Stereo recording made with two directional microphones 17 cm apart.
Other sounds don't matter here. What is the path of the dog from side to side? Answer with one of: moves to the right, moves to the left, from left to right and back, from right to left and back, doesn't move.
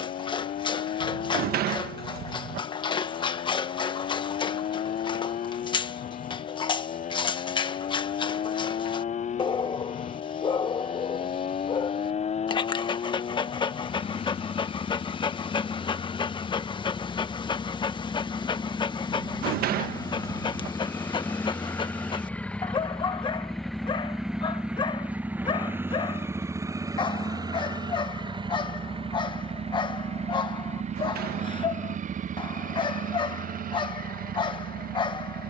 doesn't move.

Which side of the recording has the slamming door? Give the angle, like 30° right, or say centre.
60° right.